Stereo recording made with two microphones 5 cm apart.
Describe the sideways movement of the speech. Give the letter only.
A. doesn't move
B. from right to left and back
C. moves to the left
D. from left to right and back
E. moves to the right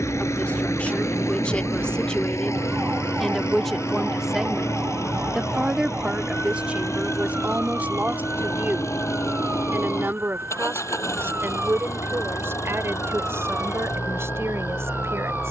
E.